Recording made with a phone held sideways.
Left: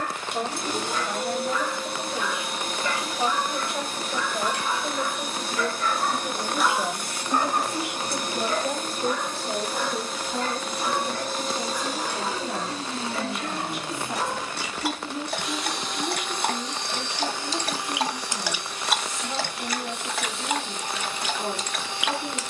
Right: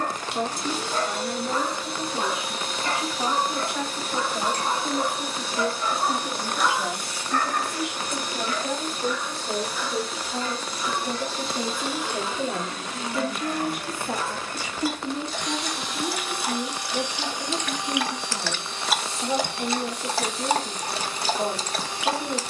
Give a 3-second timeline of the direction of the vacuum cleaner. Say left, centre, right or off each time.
left, left, left, left, left, centre, right, right.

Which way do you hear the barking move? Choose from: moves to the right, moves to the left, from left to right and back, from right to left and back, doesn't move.
from right to left and back.